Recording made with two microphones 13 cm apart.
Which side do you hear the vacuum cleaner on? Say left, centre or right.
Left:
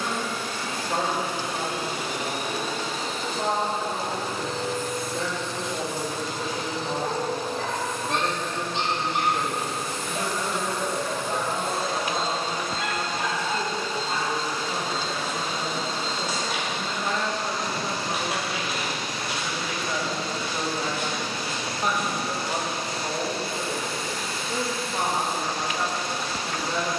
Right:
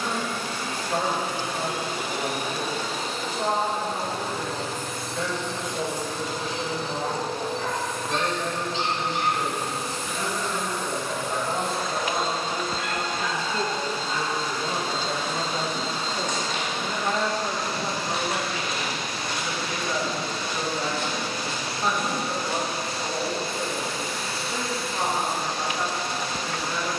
right.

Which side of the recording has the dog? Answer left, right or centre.
left.